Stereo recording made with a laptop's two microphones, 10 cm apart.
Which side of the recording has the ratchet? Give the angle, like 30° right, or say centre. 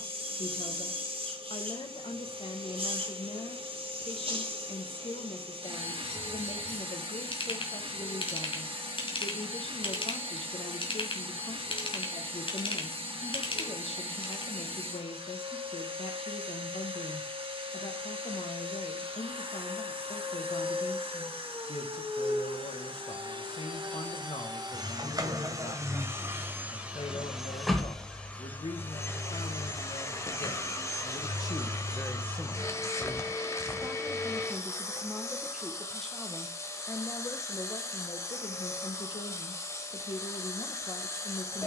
50° left.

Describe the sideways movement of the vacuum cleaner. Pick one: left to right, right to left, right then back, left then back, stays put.
right to left.